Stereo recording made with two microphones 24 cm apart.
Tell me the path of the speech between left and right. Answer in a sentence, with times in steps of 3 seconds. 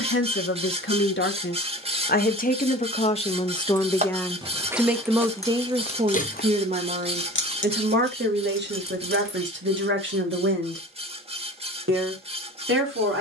In this clip you hear the speech on the left from 0 s, in the centre from 3 s and on the right from 6 s.